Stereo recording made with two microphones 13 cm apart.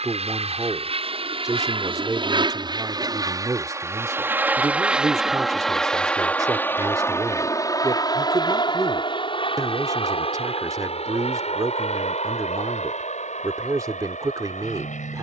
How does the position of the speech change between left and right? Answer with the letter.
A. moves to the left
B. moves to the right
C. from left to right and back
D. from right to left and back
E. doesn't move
E.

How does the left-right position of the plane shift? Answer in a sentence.
In this clip you hear the plane move from right to left.